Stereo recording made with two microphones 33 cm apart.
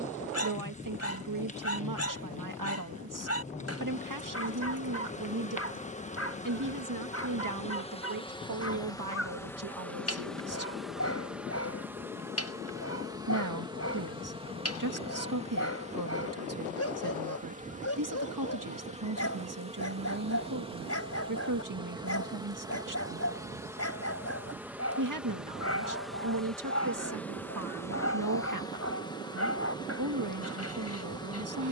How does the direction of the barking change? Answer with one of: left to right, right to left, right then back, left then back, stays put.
stays put.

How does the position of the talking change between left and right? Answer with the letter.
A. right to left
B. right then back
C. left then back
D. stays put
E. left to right
D.